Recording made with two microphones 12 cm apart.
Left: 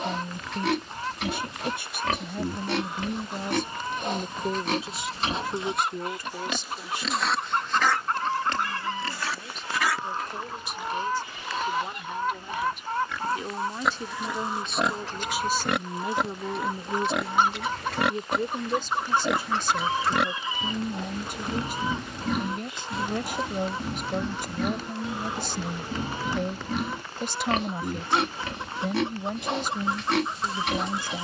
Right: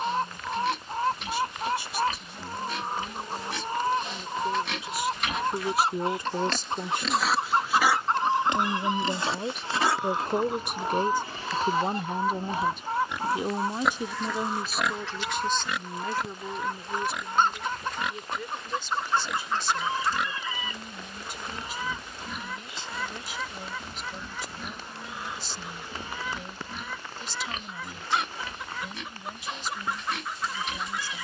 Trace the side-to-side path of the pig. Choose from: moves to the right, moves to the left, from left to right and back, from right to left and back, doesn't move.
from left to right and back.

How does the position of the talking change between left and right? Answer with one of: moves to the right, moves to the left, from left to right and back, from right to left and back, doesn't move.
from left to right and back.